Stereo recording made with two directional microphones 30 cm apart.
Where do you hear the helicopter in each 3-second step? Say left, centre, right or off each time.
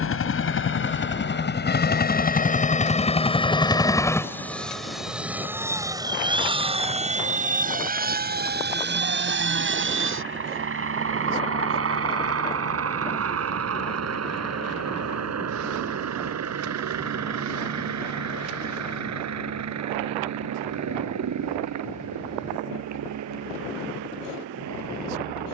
left, centre, right, right, right, right, right, right, right.